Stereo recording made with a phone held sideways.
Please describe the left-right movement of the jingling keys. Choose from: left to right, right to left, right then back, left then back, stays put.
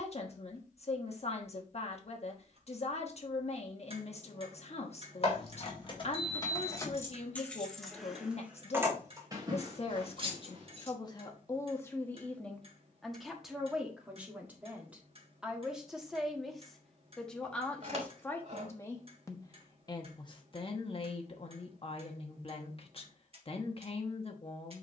left to right.